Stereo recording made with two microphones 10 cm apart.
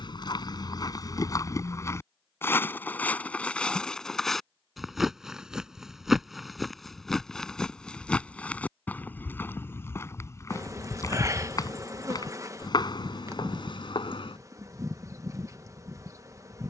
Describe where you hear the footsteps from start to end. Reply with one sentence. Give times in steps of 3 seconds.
You can hear the footsteps on the left from 0 s, in the centre from 3 s, on the left from 9 s and not at all from 15 s.